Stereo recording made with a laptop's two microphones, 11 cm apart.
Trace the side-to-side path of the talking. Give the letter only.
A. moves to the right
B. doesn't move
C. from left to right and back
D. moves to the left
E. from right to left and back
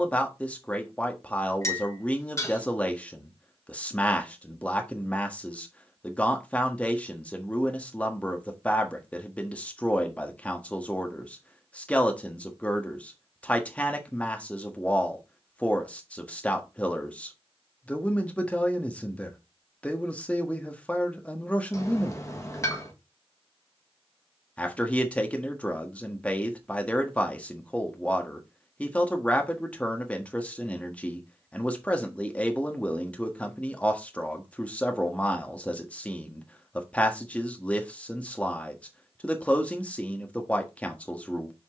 B.